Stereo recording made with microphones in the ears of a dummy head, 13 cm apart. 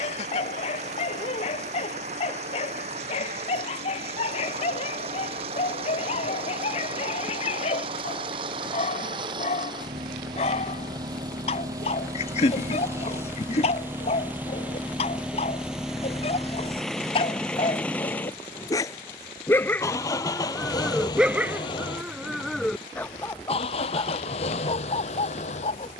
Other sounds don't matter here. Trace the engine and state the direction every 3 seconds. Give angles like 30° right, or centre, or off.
50° right, 50° right, 40° right, 30° right, 20° right, centre, 20° left, 40° left, 50° left.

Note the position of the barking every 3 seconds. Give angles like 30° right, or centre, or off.
50° left, 50° left, 50° left, 50° left, 50° left, 40° left, 10° left, centre, 40° left.